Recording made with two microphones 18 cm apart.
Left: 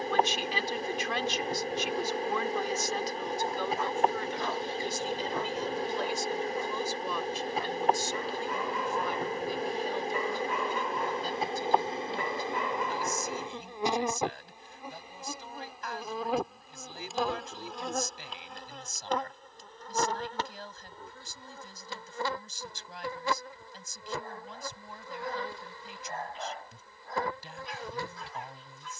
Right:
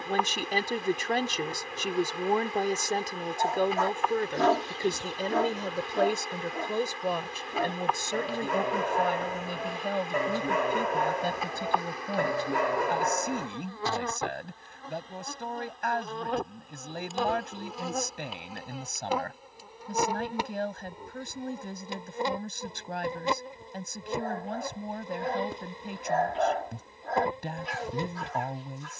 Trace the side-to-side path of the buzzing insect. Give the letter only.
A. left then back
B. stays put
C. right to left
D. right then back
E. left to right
E.